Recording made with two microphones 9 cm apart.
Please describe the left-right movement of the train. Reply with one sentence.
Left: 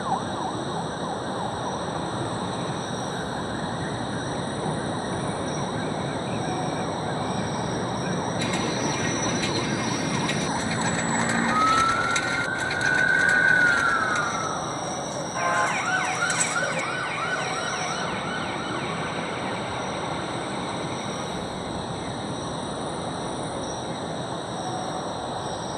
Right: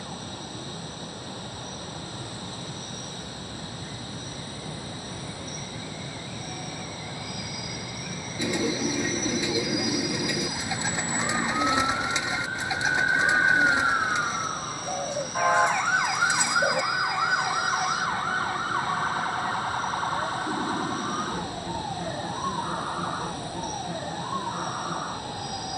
You can hear the train stay put.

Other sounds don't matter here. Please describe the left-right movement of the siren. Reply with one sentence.
You can hear the siren move to the right.